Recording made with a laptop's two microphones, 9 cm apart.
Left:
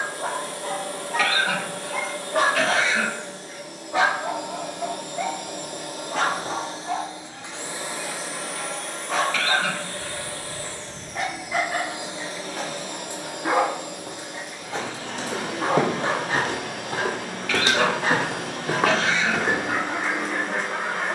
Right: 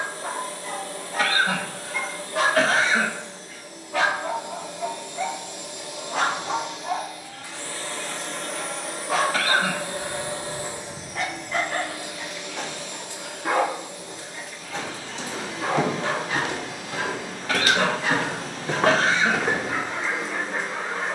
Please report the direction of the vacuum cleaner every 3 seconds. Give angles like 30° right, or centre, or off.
70° left, 60° left, 20° left, 10° right, 50° left, 60° left, 60° left.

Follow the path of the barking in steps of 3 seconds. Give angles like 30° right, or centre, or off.
70° left, 10° left, 10° right, centre, 20° left, 40° left, 60° left.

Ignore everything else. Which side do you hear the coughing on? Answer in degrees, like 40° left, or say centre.
40° right.